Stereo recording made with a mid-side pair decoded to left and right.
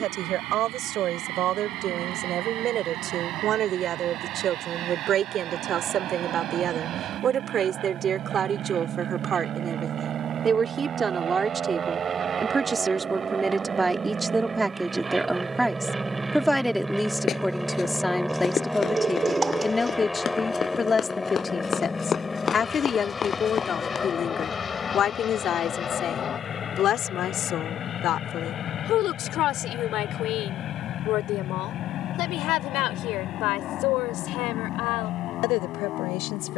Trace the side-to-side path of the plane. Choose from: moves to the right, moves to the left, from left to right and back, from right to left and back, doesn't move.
moves to the left.